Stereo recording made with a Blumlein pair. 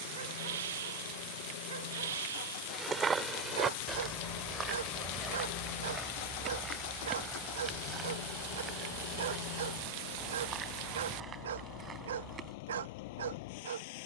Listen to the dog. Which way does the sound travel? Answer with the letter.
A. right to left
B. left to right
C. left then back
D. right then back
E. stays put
E.